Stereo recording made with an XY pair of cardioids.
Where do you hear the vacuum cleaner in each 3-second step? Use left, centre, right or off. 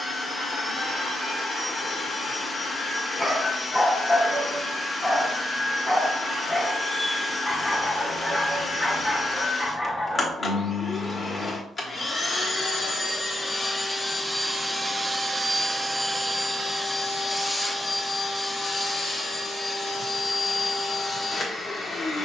left, left, left, left, left, centre, left, left.